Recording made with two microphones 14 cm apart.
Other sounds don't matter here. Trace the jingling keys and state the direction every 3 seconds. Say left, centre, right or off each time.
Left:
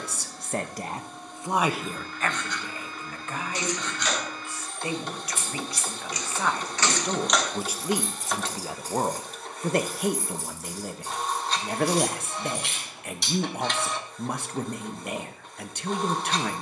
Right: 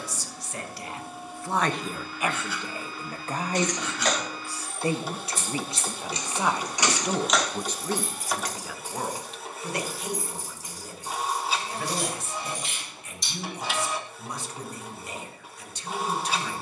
off, right, centre, left, left, off.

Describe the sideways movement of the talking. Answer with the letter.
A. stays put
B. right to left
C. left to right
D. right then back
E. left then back
D.